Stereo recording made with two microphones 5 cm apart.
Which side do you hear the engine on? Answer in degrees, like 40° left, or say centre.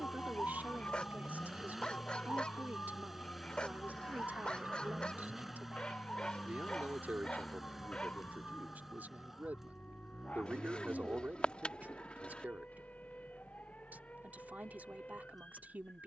centre.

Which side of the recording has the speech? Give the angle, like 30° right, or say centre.
30° right.